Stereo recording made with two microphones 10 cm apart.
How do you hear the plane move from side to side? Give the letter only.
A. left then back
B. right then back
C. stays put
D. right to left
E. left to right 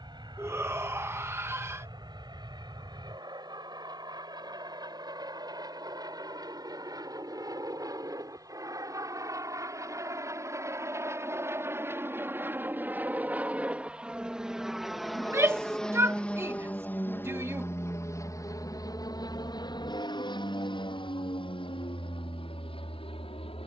D.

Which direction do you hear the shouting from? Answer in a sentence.
You can hear the shouting on the right.